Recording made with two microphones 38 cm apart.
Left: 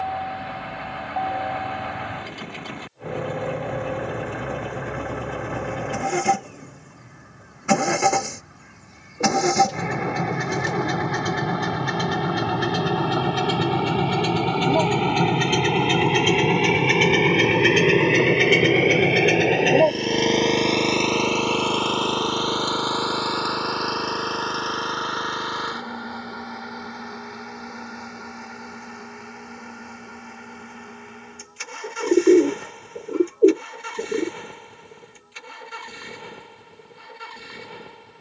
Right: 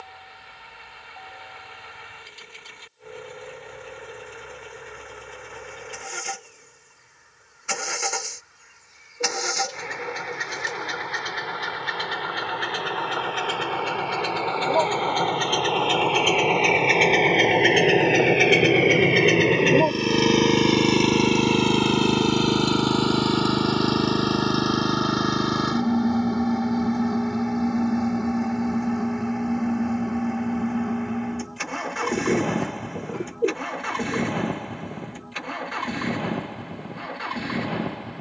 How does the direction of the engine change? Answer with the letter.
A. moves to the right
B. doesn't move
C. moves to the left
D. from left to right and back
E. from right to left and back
A.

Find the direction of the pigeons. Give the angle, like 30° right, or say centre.
70° left.